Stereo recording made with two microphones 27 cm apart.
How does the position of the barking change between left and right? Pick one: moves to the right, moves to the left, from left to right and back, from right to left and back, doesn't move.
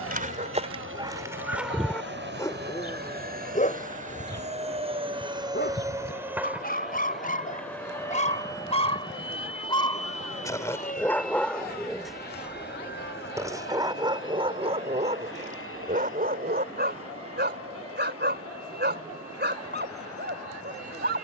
from right to left and back.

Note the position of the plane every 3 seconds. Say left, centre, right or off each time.
right, right, centre, left, left, left, left.